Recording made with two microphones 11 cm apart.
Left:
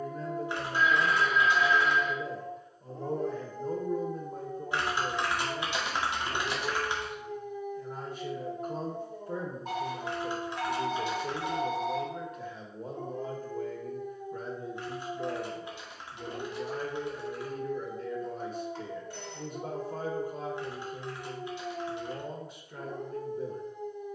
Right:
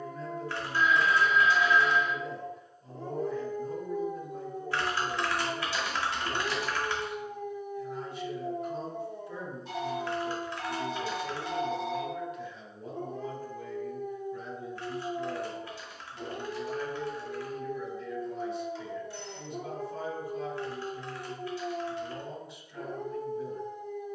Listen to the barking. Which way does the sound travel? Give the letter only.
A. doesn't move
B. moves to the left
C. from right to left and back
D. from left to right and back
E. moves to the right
E.